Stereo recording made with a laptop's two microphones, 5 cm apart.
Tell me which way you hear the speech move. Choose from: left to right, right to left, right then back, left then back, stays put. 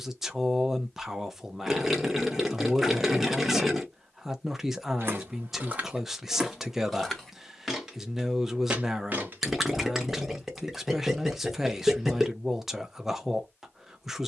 stays put.